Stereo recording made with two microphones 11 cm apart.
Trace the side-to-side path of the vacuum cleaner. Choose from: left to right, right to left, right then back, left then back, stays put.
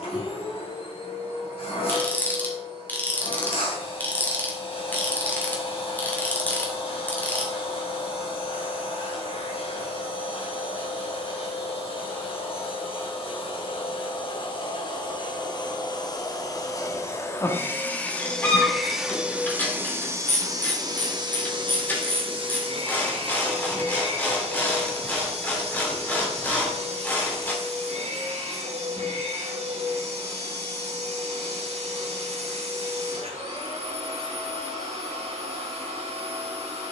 left to right.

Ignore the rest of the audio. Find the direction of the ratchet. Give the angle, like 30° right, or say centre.
20° left.